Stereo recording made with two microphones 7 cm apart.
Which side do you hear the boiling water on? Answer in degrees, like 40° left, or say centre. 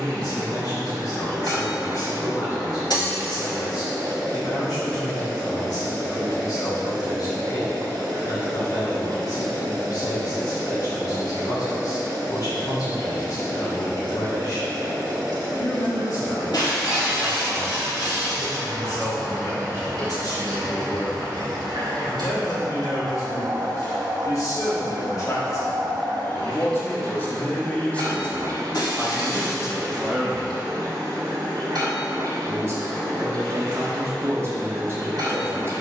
80° right.